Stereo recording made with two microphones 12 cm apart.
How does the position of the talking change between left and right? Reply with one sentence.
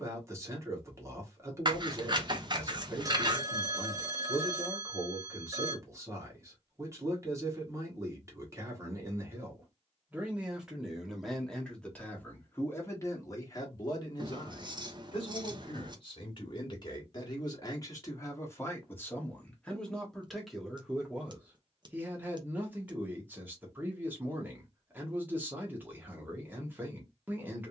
You can hear the talking move from right to left and back again.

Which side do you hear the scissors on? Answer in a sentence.
You can hear the scissors on the right.